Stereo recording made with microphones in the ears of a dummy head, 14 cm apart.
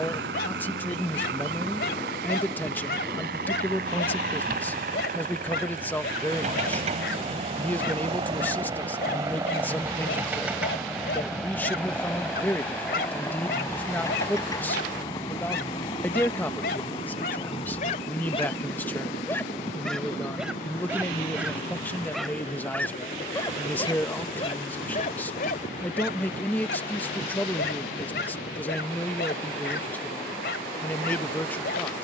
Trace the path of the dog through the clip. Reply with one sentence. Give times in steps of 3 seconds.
In this clip you hear the dog on the left from 0 s, in the centre from 18 s and on the left from 24 s.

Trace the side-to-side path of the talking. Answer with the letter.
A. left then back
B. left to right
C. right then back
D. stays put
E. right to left
D.